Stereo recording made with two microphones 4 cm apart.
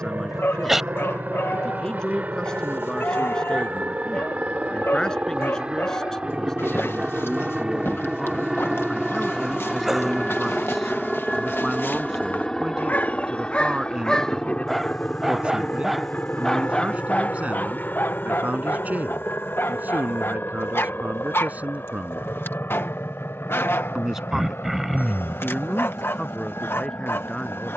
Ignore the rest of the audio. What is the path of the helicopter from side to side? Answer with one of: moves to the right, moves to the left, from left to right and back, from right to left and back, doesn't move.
moves to the left.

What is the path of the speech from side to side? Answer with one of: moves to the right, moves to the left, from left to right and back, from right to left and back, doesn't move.
from left to right and back.